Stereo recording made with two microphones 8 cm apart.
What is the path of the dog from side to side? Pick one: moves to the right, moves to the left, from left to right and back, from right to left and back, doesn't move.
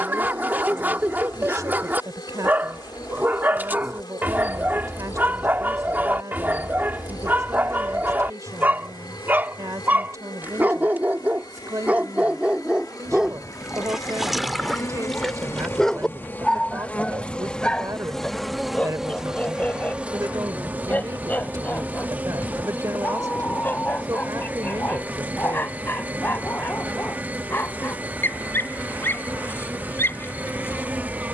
moves to the left.